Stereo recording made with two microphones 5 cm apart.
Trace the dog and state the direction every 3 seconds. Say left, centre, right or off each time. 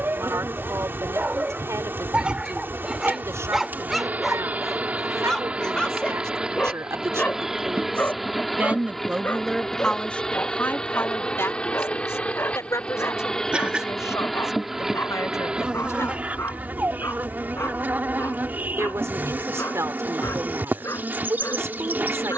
right, centre, left, left, left, left, left, left.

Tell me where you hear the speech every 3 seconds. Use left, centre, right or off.
right, right, right, left, left, left, right, right.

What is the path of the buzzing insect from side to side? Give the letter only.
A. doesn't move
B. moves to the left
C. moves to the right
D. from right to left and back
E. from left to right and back
D.